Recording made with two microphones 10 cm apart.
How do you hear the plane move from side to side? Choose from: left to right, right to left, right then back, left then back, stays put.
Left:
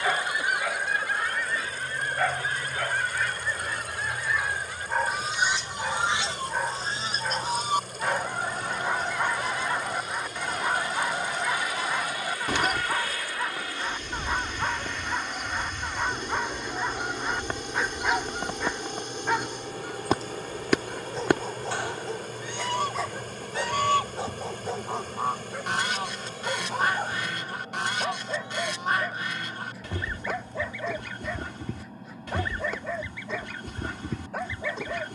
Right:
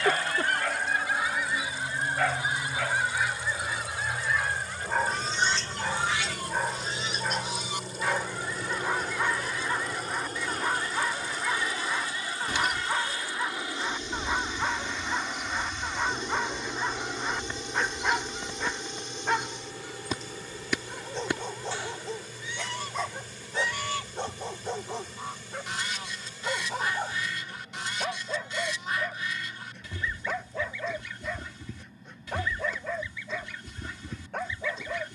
right to left.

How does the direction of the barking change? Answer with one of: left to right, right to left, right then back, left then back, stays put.
stays put.